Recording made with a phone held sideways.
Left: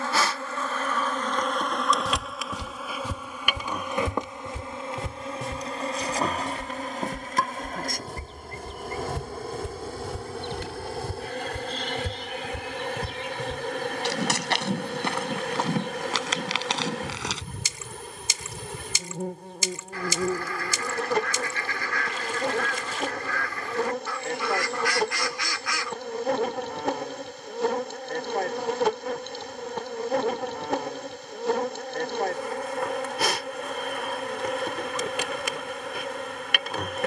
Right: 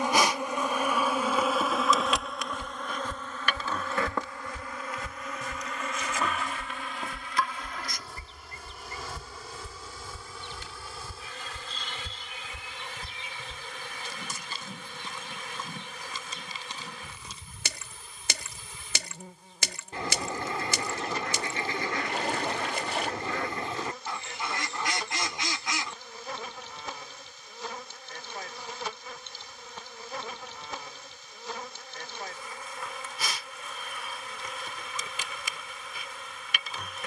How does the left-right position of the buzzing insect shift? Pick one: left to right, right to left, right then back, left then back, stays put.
right to left.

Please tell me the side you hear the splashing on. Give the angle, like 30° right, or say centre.
60° right.